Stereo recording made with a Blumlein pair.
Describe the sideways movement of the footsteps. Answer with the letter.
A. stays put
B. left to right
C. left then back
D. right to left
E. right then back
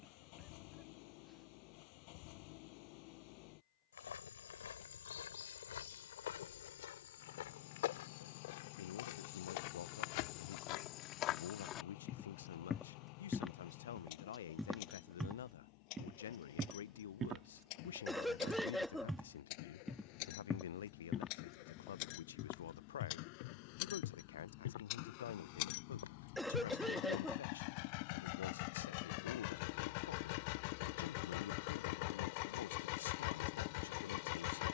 E.